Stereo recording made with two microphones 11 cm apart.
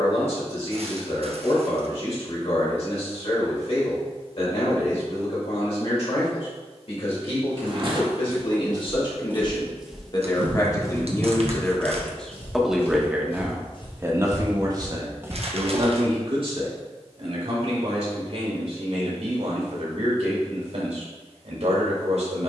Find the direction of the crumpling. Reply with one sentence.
In this clip you hear the crumpling on the right.